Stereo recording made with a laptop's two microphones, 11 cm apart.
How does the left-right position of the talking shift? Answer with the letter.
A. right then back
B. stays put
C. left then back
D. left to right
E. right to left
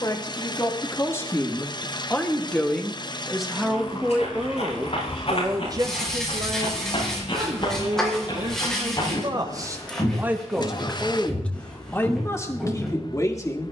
A.